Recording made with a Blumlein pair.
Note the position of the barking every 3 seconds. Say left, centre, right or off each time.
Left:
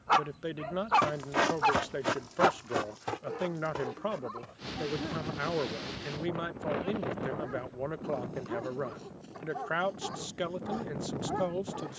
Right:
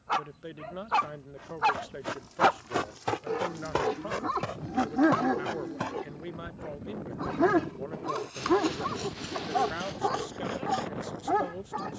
centre, right, right, right.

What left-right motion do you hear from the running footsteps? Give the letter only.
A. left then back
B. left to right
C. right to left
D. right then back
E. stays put
B.